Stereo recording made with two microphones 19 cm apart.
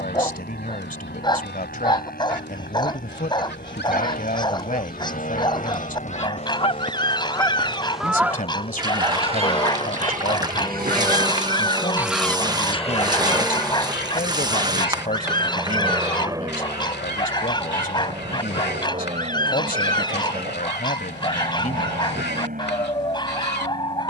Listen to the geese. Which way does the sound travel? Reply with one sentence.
You can hear the geese go right and come back.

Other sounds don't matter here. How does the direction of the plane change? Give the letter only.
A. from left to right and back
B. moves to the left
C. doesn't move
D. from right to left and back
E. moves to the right
E.